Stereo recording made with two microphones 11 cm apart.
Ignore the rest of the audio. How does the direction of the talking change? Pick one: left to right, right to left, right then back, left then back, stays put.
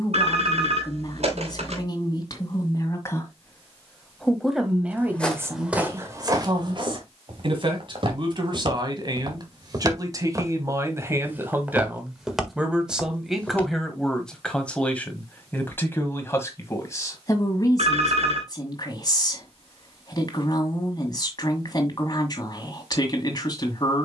right then back.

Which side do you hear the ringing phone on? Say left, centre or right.
right.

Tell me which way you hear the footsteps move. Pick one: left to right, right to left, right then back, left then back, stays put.
right then back.